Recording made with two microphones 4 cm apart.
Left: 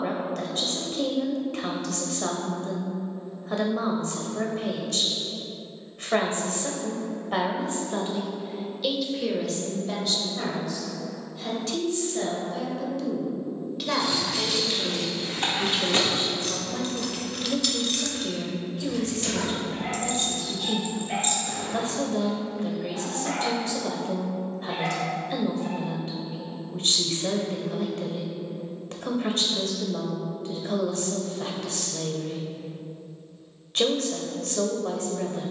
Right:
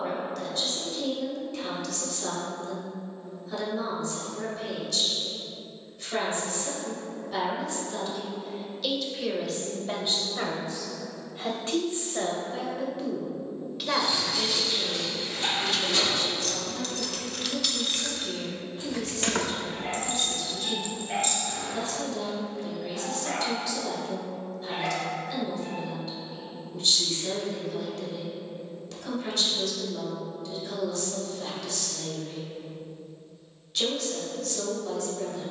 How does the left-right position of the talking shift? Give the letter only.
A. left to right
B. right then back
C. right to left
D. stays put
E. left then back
B.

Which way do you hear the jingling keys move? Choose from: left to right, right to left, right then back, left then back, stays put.
right then back.